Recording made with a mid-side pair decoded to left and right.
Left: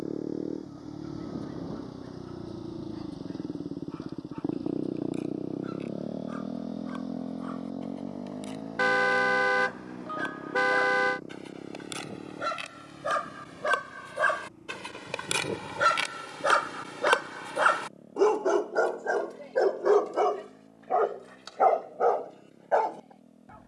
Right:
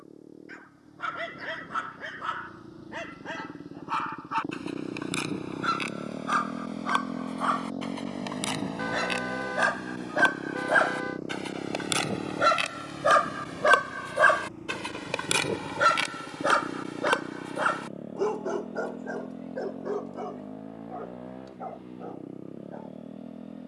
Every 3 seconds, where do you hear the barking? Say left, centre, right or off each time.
right, right, right, right, right, centre, left, left.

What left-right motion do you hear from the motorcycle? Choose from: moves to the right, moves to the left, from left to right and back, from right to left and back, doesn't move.
moves to the right.